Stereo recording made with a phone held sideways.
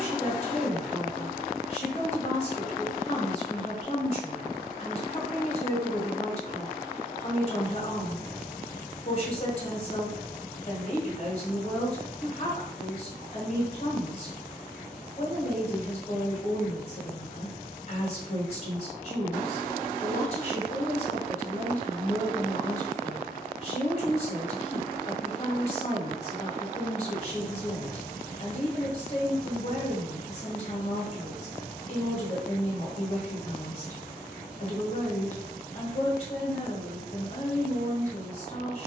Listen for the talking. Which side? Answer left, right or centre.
left.